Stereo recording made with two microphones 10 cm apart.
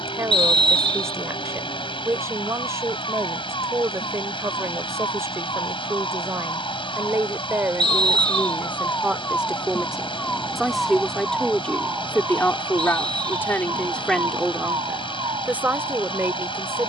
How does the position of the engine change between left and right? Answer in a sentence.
In this clip you hear the engine stay in one place.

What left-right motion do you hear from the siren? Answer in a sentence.
You can hear the siren move from left to right.